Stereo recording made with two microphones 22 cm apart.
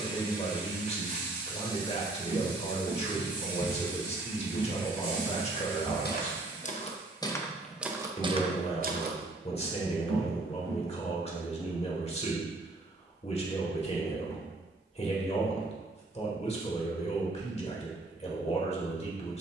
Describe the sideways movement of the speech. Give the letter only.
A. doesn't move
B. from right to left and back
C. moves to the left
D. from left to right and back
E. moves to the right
A.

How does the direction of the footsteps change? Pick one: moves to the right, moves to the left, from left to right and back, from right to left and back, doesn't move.
from right to left and back.